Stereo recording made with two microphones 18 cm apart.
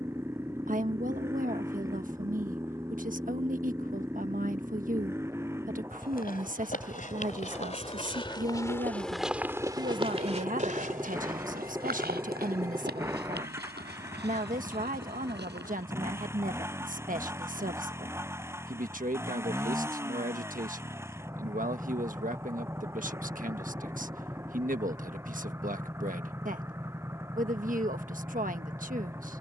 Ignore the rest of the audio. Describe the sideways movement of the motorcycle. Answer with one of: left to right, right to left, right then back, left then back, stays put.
stays put.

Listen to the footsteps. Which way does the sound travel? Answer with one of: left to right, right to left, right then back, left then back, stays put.
left to right.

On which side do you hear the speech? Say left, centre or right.
right.